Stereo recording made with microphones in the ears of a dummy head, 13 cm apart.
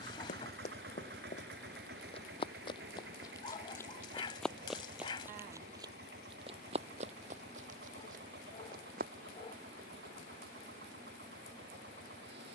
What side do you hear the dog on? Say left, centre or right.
left.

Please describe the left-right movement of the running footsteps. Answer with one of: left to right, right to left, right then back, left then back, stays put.
left to right.